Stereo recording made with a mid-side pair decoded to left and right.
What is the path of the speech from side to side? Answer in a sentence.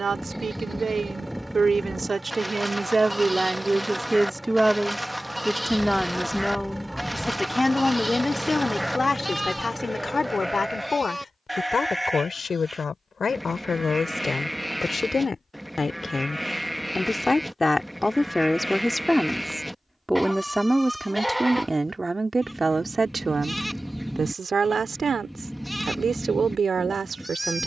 You can hear the speech move from right to left and back again.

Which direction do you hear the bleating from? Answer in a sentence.
In this clip you hear the bleating in the centre.